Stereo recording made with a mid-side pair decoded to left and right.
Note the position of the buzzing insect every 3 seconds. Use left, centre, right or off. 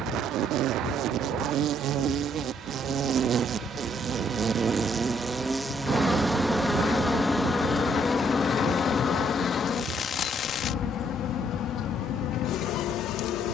right, right, centre, left, left.